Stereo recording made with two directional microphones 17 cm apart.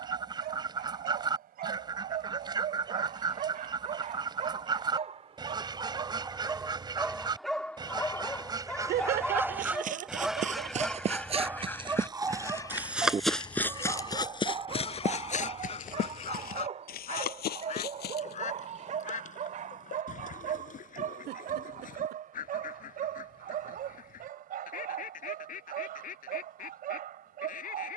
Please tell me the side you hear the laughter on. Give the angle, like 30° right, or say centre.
70° right.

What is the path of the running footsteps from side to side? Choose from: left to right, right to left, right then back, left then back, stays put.
right to left.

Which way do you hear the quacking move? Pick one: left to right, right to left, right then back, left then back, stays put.
right to left.